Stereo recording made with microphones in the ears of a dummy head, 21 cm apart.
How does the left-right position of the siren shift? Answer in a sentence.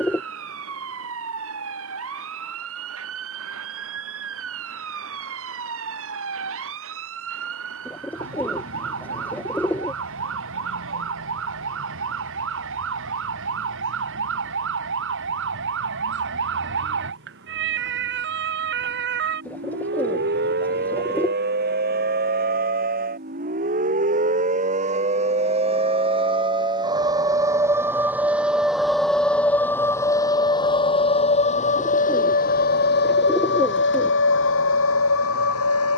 You can hear the siren go from the right side to the left.